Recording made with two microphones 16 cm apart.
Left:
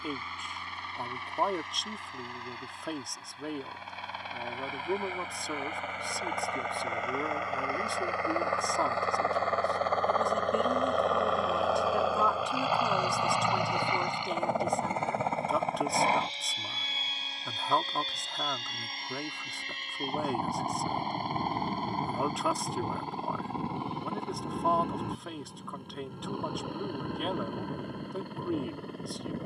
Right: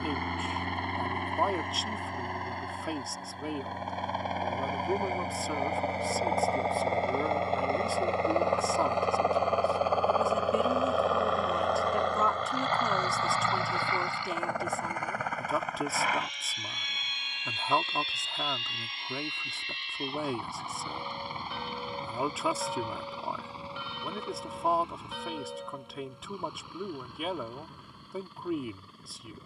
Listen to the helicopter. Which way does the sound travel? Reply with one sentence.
In this clip you hear the helicopter move from right to left.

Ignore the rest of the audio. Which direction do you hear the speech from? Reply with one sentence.
You can hear the speech in the centre.